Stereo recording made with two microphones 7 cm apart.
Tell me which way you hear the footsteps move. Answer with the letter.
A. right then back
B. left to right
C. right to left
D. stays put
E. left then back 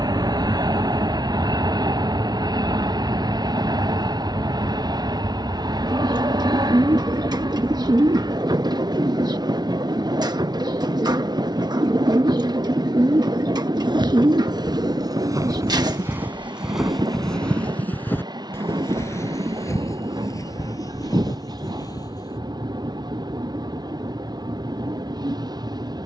C.